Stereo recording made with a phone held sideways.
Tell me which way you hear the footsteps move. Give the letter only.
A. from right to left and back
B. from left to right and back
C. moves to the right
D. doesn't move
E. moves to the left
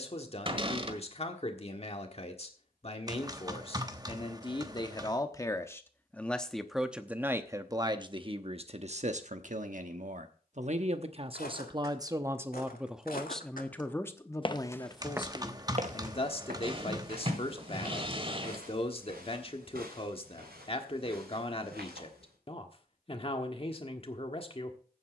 C.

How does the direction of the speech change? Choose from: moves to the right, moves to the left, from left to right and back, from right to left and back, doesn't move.
from left to right and back.